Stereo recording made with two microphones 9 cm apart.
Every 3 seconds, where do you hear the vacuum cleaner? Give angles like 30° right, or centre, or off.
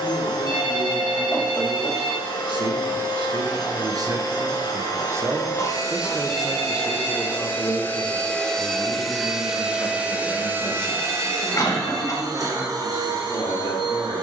60° left, 50° left, 20° left, 20° right, 50° right.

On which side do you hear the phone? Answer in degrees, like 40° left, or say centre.
70° right.